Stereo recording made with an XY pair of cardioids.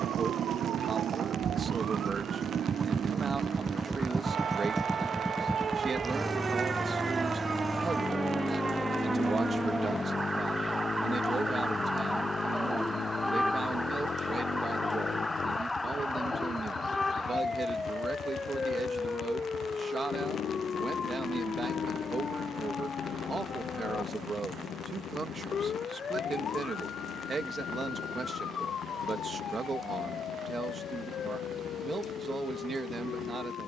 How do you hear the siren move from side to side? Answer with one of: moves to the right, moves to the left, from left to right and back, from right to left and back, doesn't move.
moves to the left.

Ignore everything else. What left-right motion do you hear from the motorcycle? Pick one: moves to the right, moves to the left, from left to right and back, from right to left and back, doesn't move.
moves to the left.